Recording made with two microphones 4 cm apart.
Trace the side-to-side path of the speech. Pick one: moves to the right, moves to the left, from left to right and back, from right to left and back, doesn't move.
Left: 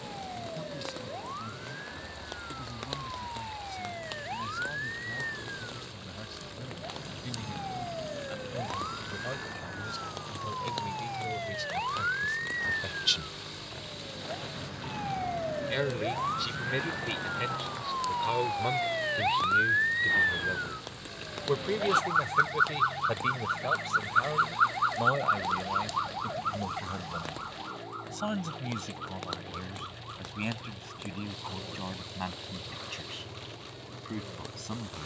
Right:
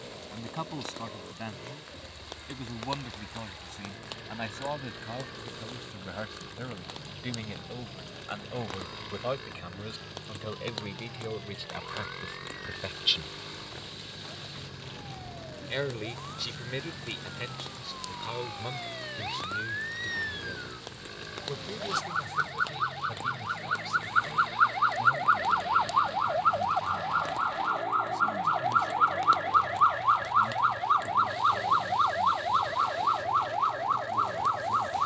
moves to the left.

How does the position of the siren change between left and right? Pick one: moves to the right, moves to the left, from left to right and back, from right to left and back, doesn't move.
moves to the right.